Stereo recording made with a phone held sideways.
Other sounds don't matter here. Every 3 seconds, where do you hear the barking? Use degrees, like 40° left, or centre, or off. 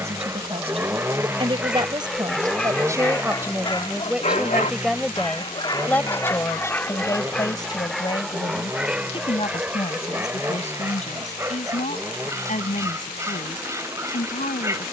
10° right, 30° left, 10° left, 10° right, 20° right.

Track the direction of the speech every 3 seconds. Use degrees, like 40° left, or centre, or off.
30° right, centre, 20° left, 40° left, 50° left.